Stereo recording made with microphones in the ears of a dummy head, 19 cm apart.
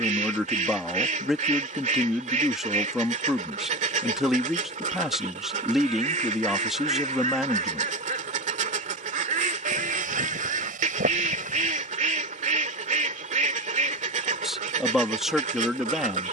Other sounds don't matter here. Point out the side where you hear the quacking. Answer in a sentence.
You can hear the quacking on the right.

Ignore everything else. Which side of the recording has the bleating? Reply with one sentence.
In this clip you hear the bleating on the right.